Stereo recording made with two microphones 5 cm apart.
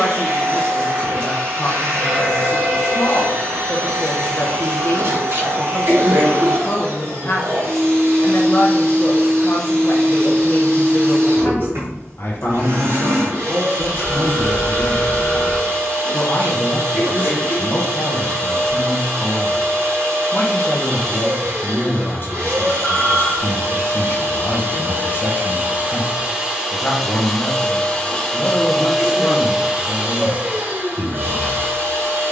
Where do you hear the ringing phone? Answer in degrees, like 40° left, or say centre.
50° left.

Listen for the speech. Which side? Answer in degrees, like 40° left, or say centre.
50° left.